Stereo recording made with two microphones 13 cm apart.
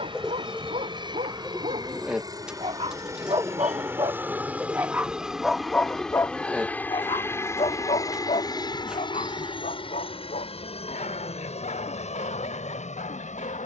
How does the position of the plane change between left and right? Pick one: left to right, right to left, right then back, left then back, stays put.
right to left.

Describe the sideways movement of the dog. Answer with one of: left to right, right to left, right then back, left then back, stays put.
right to left.